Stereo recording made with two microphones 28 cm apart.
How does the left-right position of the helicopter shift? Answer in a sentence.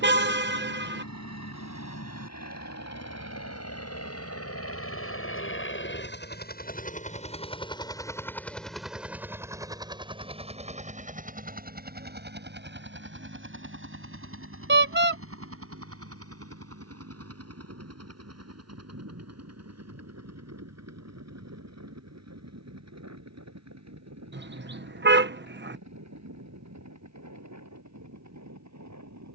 You can hear the helicopter move to the right.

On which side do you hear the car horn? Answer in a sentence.
You can hear the car horn on the right.